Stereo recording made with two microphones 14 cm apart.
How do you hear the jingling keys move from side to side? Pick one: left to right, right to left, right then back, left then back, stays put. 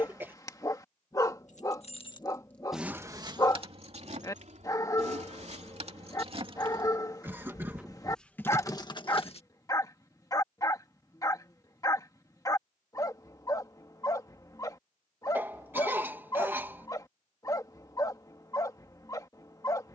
right then back.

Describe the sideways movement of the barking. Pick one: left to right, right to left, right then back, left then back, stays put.
stays put.